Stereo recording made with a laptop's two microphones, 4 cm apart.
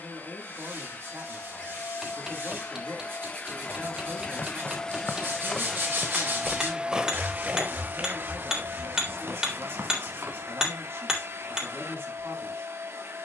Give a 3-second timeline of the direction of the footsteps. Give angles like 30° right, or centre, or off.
off, 40° left, 30° right, 60° right, off.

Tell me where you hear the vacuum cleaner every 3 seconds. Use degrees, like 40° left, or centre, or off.
40° left, 20° left, 40° right, 70° right, 70° right.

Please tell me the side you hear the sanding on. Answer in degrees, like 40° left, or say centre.
60° right.